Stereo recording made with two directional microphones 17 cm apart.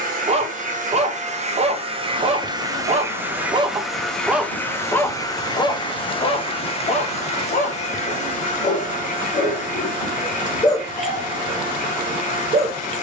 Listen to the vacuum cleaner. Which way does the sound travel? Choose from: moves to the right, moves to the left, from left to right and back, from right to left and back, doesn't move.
moves to the left.